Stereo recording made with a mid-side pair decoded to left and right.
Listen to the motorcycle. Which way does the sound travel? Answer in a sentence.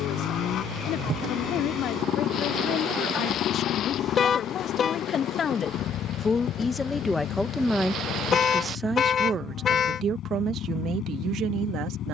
In this clip you hear the motorcycle stay in one place.